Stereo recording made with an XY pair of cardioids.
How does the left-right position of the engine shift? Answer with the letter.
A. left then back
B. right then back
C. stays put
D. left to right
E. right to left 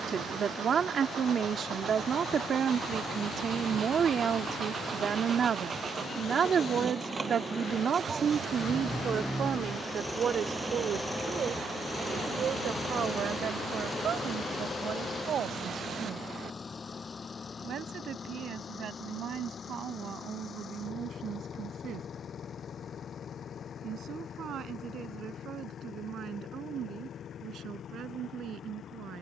E.